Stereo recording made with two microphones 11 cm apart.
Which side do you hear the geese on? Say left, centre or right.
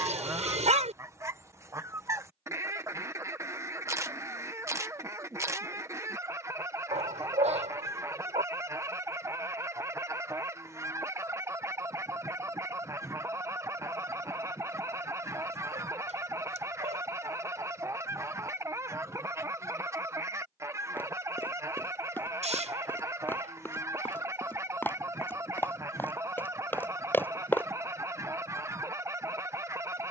right.